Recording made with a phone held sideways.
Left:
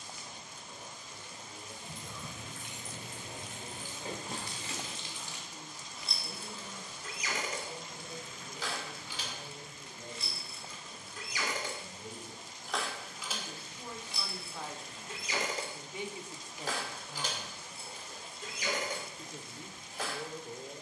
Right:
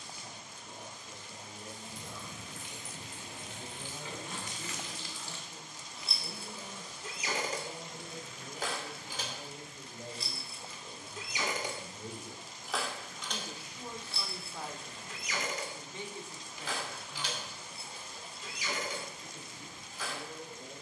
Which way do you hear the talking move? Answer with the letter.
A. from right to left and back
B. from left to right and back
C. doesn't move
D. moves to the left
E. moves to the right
D.